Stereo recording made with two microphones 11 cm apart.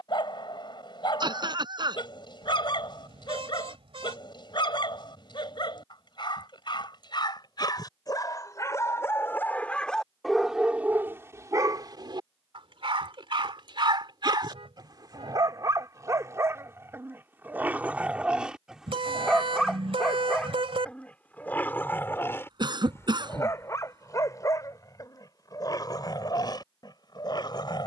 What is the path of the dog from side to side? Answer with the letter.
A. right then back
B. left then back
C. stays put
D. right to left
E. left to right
A.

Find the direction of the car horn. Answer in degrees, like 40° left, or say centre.
60° right.